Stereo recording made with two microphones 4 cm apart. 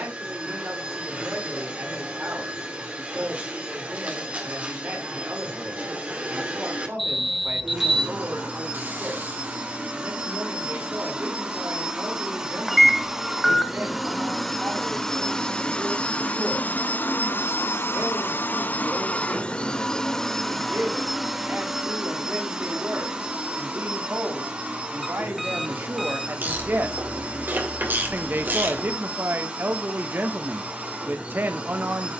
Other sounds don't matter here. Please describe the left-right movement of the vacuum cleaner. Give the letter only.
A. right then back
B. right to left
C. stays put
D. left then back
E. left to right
D.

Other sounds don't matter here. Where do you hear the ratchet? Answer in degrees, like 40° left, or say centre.
50° right.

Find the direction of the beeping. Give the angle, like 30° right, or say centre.
centre.